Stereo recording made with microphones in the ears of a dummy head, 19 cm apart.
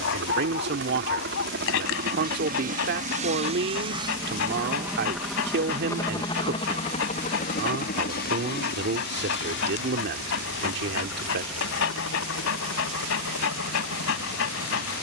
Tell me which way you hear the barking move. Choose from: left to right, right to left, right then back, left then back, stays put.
stays put.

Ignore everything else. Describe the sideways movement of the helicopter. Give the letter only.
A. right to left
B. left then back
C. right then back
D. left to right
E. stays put
A.